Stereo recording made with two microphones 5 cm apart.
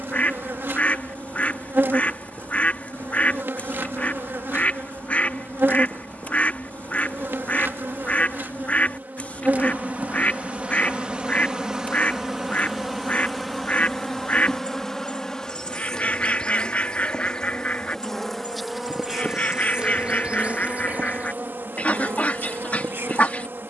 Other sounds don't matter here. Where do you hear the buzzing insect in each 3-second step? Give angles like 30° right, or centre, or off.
50° right, 50° right, 50° right, 30° right, centre, 10° left, 20° right, 50° right.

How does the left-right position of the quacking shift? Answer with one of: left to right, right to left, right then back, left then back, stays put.
stays put.